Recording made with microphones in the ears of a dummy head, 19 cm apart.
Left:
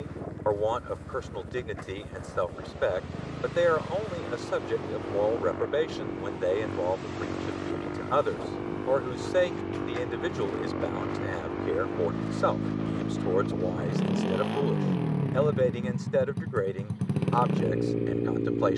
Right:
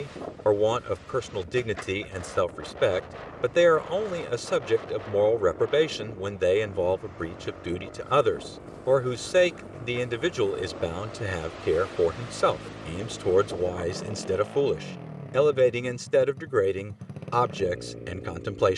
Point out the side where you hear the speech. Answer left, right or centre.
right.